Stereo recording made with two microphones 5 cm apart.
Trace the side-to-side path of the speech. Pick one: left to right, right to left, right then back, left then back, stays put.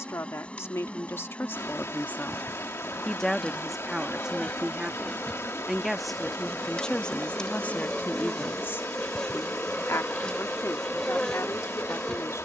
right then back.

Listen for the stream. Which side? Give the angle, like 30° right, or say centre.
60° left.